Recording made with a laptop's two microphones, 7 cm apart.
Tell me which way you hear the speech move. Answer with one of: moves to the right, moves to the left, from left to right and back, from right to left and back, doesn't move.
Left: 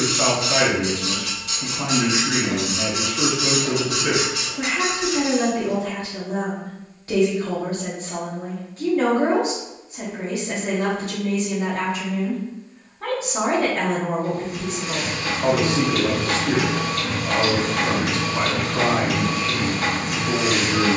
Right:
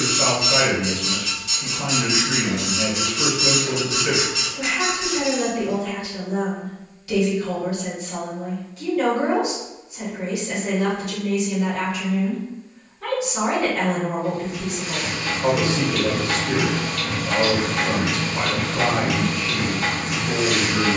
doesn't move.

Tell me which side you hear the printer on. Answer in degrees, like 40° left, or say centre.
60° left.